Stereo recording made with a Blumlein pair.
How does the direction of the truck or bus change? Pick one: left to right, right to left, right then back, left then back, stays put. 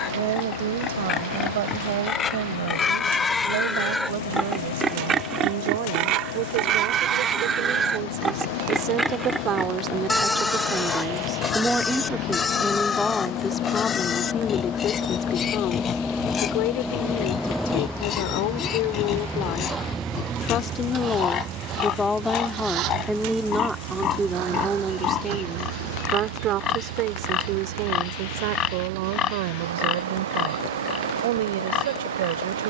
left to right.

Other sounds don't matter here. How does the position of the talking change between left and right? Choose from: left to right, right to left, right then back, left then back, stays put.
left then back.